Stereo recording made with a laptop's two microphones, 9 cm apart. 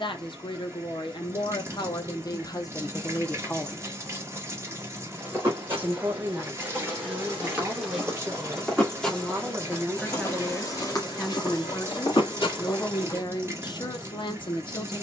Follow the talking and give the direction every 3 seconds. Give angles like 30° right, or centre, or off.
60° left, 10° left, 30° right, 10° right, 50° left.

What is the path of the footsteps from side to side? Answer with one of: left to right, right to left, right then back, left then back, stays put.
right to left.